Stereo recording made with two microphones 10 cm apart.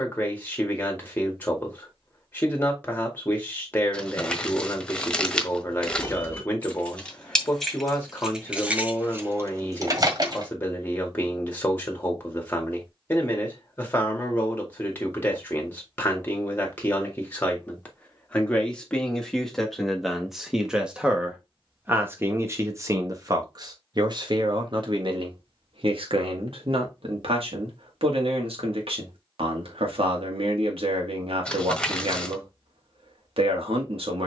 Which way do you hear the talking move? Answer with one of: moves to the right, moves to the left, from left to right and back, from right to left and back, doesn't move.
moves to the right.